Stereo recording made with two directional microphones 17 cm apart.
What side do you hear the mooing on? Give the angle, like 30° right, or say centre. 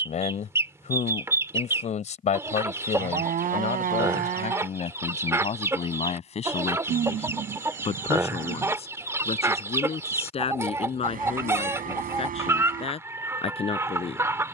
50° right.